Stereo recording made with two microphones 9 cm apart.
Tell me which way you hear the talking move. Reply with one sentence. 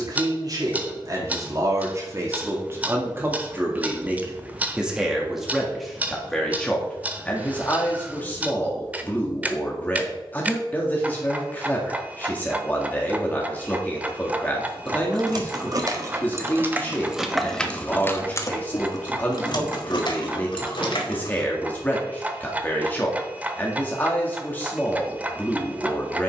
In this clip you hear the talking move to the left.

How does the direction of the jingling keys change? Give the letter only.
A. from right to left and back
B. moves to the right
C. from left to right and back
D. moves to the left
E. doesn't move
D.